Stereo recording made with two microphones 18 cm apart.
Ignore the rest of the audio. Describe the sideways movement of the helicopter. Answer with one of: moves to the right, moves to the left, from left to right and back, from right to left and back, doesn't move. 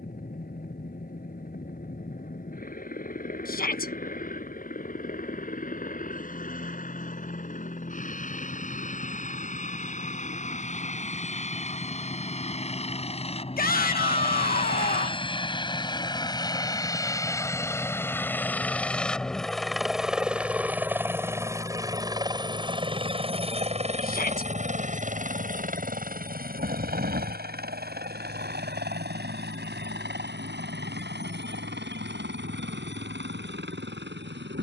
moves to the right.